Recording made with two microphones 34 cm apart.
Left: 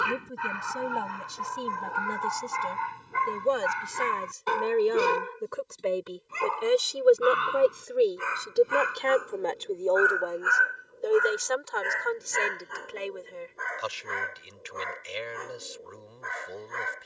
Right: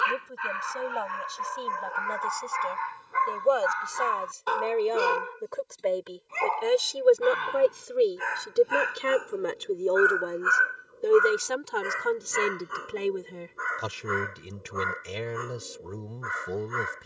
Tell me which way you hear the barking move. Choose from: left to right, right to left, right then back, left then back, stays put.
left to right.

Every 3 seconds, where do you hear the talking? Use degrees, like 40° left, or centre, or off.
40° left, 20° left, centre, 30° right, 60° right, 60° right.